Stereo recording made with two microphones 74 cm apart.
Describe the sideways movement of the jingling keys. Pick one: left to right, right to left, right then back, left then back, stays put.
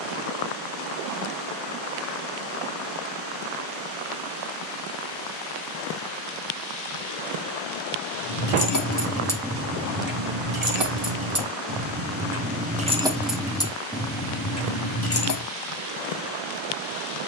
right then back.